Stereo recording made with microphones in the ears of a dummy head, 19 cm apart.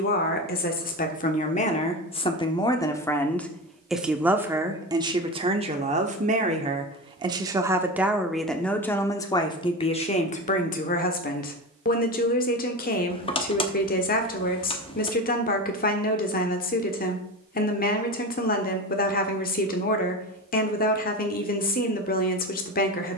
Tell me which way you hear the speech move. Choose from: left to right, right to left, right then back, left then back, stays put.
right then back.